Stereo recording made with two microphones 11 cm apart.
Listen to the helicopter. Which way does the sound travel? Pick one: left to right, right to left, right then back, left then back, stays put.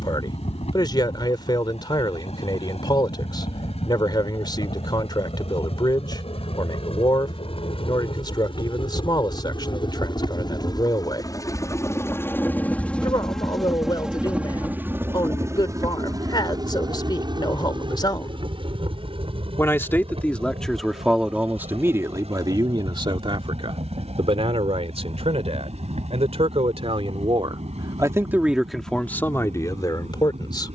left to right.